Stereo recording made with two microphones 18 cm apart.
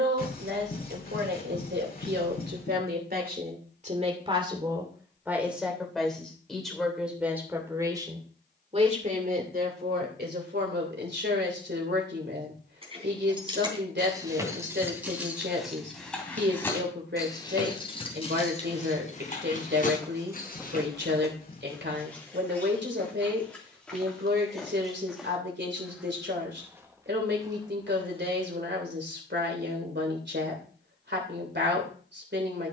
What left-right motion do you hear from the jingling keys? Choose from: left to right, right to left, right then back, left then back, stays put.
right to left.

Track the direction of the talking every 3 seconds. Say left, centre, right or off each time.
right, right, centre, right, right, right, right, right, right, right, right.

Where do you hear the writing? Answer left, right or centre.
left.